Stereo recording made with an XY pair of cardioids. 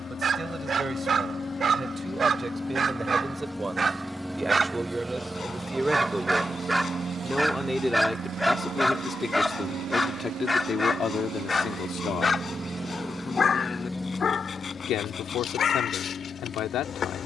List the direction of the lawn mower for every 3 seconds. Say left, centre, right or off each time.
left, centre, right, right, centre, left.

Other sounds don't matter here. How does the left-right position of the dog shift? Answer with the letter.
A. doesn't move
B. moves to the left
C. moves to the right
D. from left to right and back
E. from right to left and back
B.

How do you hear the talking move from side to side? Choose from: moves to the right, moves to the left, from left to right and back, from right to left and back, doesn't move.
moves to the left.